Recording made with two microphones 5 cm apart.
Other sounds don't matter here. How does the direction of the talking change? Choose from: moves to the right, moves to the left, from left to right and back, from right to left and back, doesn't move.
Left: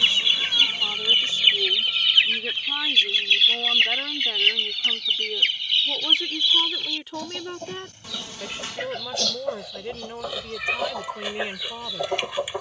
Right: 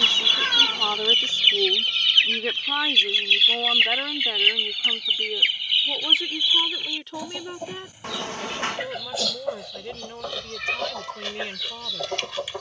moves to the left.